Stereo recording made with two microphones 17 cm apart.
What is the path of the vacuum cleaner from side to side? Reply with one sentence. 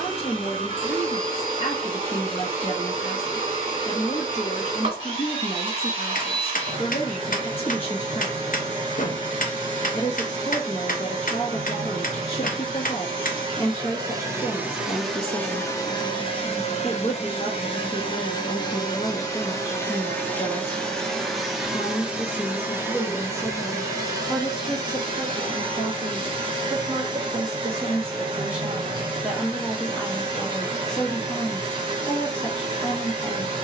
You can hear the vacuum cleaner move from right to left and back again.